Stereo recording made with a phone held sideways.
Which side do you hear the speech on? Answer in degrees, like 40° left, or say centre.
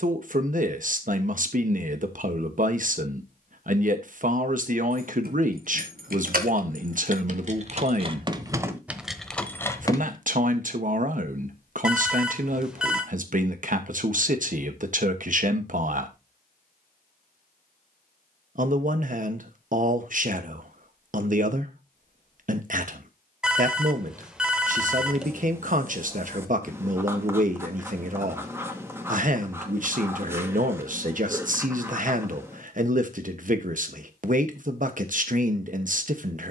60° right.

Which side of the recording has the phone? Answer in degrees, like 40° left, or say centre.
10° right.